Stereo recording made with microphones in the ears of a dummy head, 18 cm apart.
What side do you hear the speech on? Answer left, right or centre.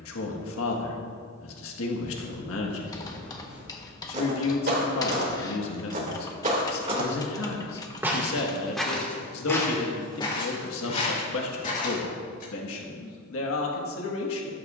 left.